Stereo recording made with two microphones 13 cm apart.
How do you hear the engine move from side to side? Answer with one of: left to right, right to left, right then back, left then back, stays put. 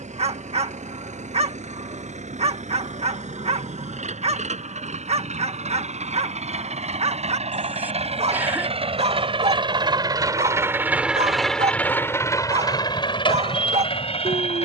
right to left.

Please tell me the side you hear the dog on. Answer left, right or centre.
right.